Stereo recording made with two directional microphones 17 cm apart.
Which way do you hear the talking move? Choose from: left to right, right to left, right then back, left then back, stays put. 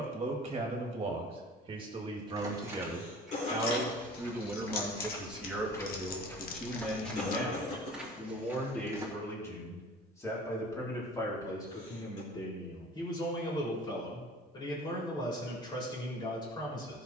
right to left.